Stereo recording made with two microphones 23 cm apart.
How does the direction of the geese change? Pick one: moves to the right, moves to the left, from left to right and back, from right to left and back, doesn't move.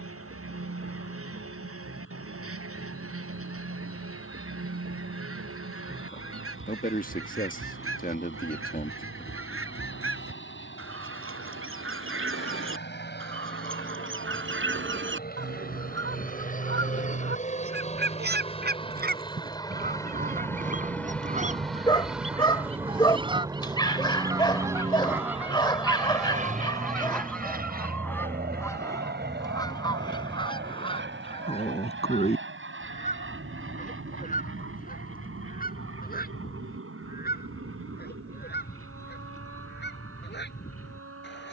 moves to the left.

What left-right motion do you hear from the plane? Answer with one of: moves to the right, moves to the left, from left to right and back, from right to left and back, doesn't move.
moves to the right.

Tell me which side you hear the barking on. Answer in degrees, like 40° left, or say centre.
20° left.